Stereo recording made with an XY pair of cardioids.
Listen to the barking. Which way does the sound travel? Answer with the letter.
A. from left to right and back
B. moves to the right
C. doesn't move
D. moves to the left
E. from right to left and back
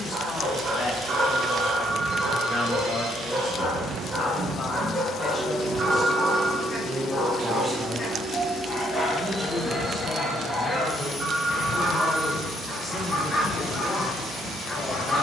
D.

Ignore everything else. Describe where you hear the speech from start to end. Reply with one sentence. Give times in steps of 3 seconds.
In this clip you hear the speech on the left from 0 s, in the centre from 6 s and on the left from 12 s.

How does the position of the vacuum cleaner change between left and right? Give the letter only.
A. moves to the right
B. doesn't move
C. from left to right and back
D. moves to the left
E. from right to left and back
D.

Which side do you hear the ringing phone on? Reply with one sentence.
In this clip you hear the ringing phone on the right.